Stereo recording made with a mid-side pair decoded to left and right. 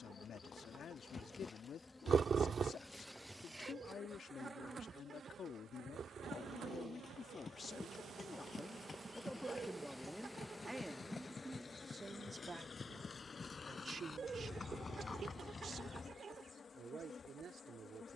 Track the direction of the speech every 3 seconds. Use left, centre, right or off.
left, left, left, centre, right, right.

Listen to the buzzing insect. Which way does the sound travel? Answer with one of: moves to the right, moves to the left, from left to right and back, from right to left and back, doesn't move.
from left to right and back.